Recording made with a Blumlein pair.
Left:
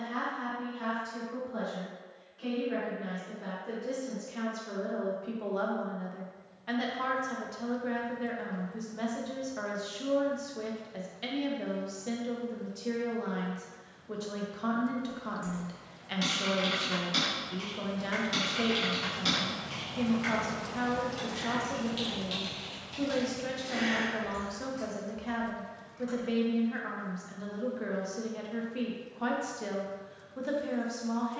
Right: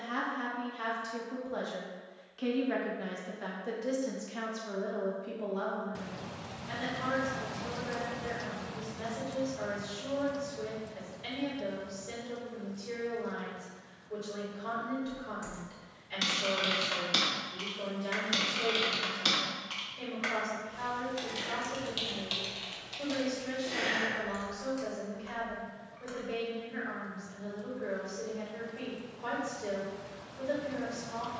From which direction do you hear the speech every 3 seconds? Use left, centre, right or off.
right, centre, left, left, left, left, left, left, left, left, left.